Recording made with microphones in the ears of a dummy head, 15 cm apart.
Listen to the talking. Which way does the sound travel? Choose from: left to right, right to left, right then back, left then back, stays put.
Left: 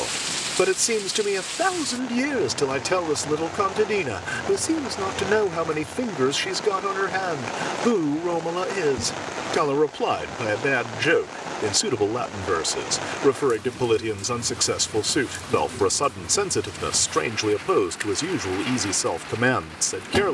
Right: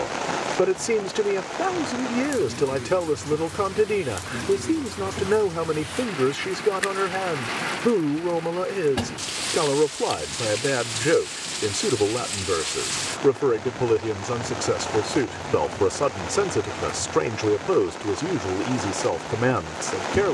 stays put.